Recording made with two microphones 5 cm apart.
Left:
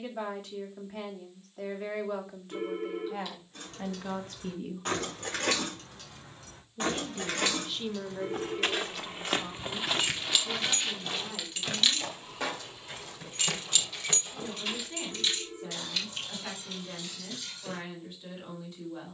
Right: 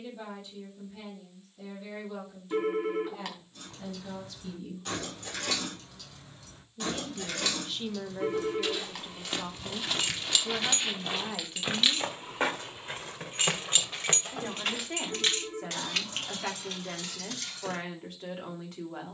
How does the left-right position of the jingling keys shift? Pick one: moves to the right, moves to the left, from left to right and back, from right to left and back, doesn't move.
moves to the right.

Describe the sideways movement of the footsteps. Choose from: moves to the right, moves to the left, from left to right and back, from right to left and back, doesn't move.
moves to the right.